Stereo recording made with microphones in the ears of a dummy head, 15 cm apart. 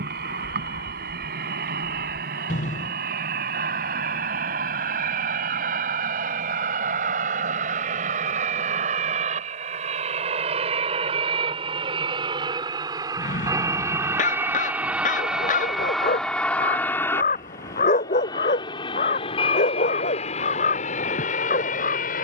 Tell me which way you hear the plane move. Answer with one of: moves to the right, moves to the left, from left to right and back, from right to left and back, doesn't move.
moves to the left.